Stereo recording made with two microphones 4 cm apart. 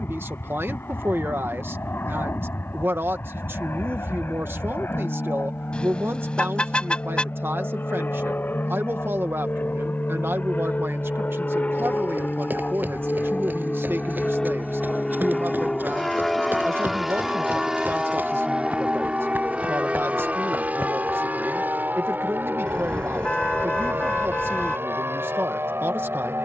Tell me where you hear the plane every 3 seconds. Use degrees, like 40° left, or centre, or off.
60° left, 60° left, 50° left, 40° left, 20° left, centre, 30° right, 50° right, 60° right.